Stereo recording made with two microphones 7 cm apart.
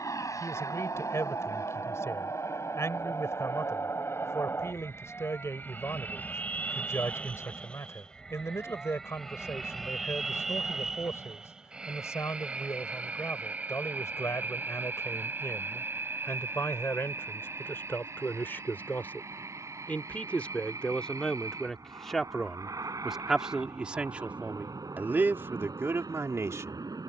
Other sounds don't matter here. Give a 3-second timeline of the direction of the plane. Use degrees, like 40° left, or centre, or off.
50° left, 30° left, 20° left, centre, 20° right, 30° right, 40° right, 50° right, 50° right.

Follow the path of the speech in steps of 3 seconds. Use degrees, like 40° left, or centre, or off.
40° left, 40° left, 40° left, 40° left, 40° left, 30° left, 20° left, centre, 30° right.